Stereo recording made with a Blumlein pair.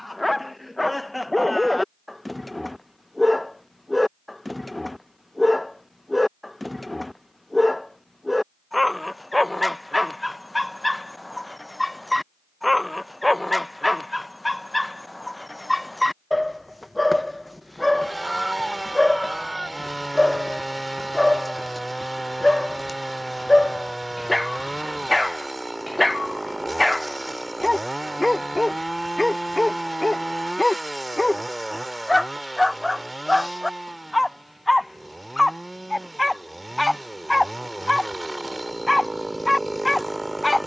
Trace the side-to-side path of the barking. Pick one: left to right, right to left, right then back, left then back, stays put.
stays put.